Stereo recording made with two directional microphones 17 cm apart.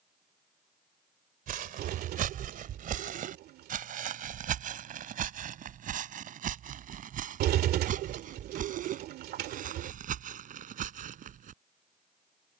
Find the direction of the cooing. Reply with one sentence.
In this clip you hear the cooing on the right.